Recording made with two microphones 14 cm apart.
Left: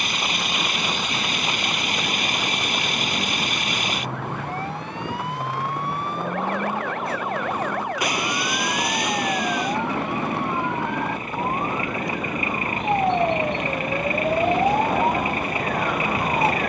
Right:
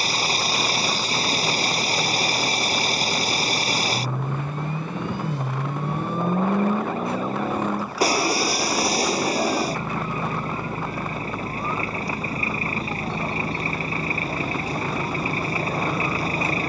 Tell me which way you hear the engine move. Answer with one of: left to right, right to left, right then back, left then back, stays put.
stays put.